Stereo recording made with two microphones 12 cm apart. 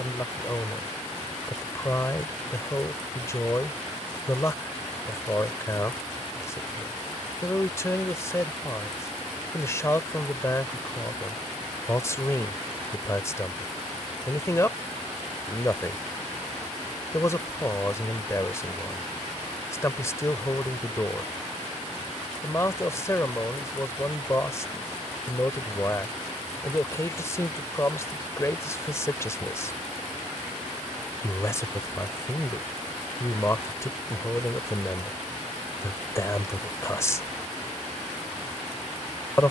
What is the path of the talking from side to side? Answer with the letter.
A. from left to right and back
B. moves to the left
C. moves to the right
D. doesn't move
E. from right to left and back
D.